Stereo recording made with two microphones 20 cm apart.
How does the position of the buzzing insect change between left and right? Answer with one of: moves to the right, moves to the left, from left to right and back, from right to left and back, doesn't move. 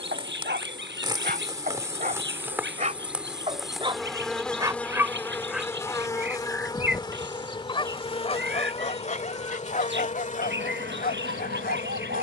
moves to the left.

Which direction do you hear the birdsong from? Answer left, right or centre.
right.